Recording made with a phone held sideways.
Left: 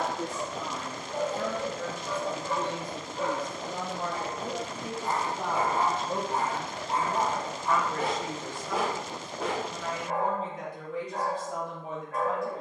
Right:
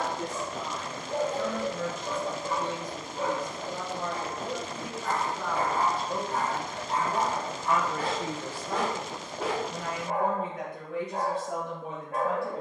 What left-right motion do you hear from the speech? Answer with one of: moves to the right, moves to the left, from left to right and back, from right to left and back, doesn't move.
moves to the right.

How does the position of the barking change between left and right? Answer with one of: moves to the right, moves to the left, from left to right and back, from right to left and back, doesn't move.
from right to left and back.